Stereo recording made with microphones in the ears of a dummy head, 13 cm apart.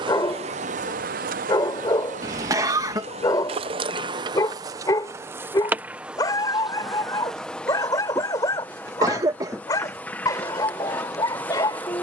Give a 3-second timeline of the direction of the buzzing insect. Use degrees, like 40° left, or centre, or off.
50° right, 30° right, centre, 10° left.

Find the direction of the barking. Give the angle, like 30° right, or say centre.
30° left.